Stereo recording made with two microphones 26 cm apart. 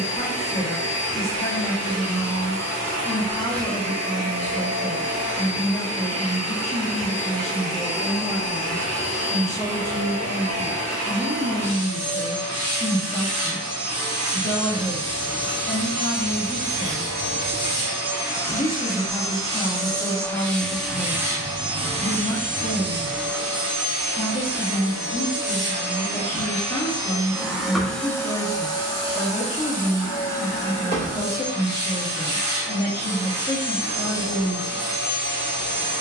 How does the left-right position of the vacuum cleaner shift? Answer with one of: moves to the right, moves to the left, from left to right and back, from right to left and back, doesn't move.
from left to right and back.